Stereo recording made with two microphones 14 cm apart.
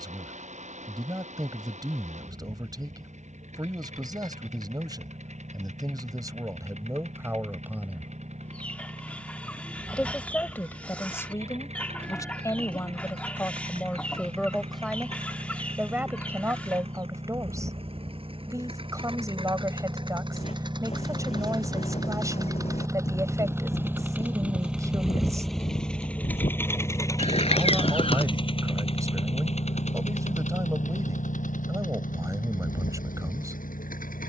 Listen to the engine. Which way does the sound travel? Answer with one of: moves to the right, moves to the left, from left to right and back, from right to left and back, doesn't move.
moves to the left.